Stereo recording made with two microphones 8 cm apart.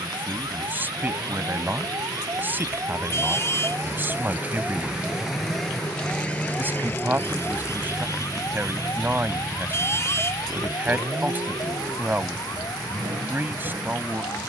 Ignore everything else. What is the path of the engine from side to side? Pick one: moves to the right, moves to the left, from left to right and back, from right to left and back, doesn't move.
moves to the right.